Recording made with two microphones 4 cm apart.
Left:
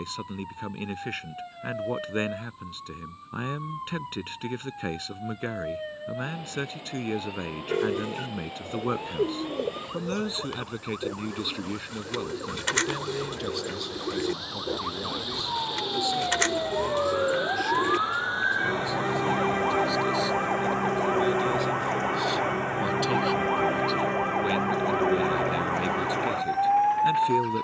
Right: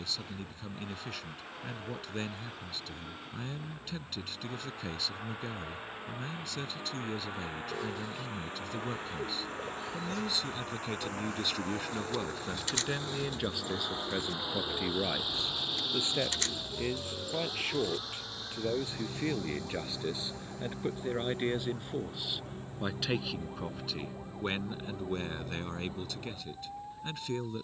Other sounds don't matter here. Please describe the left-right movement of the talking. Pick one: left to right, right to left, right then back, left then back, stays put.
right then back.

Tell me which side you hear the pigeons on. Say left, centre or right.
left.